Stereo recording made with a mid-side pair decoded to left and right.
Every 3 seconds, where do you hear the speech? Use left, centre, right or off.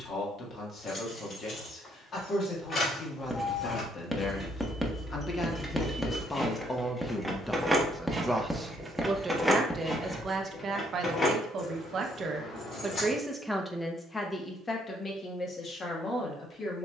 left, left, centre, right, centre, left.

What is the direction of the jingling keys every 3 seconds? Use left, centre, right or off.
left, left, centre, left, left, off.